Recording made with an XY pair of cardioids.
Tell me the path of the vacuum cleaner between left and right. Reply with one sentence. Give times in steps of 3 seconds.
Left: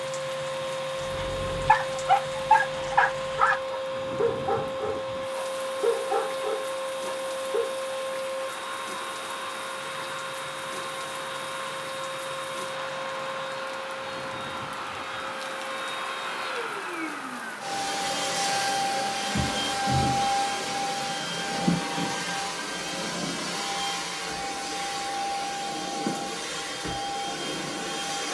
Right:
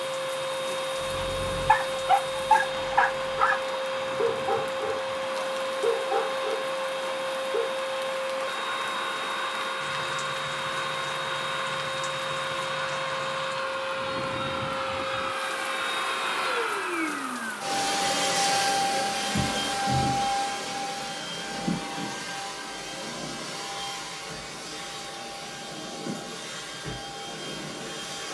You can hear the vacuum cleaner on the right from 0 s, in the centre from 18 s and on the left from 21 s.